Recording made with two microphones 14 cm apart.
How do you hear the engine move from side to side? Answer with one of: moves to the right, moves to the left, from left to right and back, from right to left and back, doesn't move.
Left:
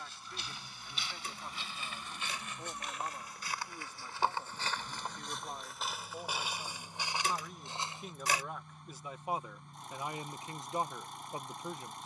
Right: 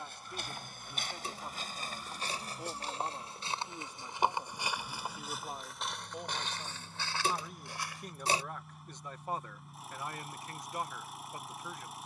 doesn't move.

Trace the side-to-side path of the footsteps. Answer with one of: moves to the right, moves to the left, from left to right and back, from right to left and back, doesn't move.
moves to the left.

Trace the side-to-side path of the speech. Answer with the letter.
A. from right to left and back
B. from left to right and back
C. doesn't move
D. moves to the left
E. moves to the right
D.